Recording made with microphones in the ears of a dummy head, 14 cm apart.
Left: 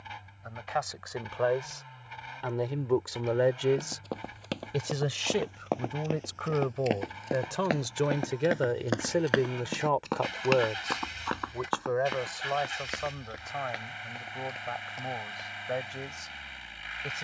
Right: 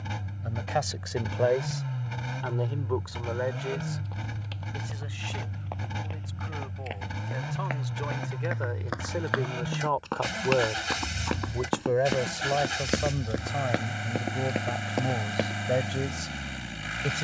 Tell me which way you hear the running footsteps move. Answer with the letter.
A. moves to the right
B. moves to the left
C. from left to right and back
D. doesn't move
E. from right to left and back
A.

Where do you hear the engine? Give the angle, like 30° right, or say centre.
60° right.